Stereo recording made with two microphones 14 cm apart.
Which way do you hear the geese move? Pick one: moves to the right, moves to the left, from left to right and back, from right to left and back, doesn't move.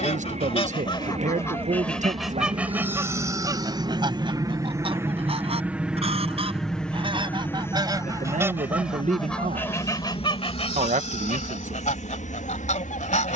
from left to right and back.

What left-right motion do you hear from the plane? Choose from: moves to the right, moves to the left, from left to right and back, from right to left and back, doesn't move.
moves to the left.